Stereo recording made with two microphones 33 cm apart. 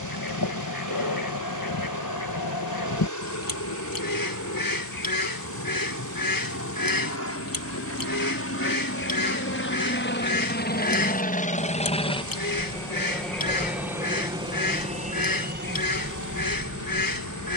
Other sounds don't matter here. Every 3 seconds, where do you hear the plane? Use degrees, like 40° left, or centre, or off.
60° left, 50° left, 50° left, 30° left, centre, 30° right.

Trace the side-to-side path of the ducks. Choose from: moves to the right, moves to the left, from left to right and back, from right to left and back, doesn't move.
doesn't move.